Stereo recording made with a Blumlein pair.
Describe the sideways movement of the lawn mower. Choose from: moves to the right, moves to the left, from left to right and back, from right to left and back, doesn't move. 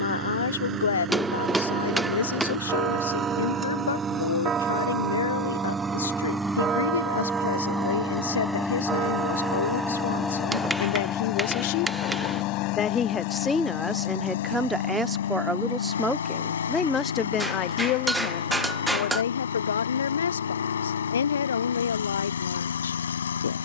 moves to the left.